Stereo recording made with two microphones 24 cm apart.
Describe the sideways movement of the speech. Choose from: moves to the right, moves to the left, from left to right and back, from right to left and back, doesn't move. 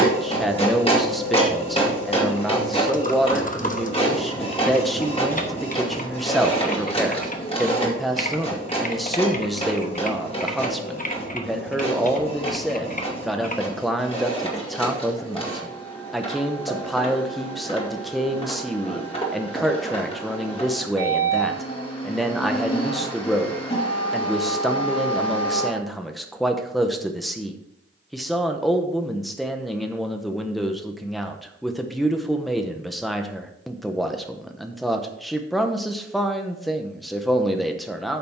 doesn't move.